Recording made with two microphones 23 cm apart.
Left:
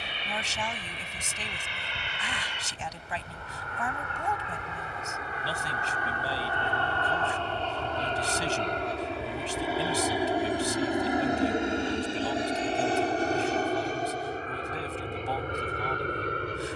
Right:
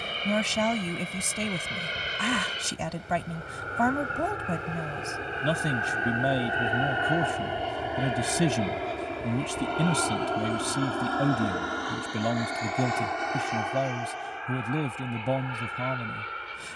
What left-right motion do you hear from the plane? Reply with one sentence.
In this clip you hear the plane travel towards the left.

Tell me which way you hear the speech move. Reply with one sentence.
In this clip you hear the speech stay put.